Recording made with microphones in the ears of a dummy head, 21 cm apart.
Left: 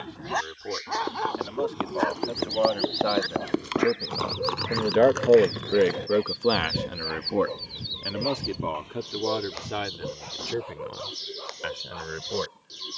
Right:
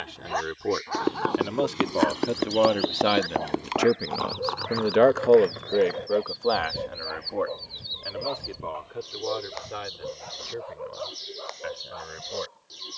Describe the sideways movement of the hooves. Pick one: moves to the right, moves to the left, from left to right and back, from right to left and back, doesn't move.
moves to the left.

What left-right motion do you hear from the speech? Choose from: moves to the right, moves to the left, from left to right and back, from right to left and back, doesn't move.
moves to the left.